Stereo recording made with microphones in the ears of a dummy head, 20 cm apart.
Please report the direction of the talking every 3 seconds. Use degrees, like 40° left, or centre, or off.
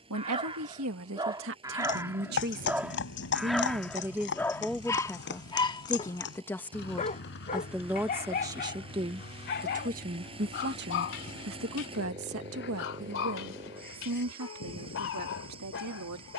60° right, centre, centre, 40° right, 70° right, 80° right.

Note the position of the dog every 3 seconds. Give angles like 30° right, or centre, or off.
20° right, 10° left, 40° left, 50° left, 60° left, 60° left.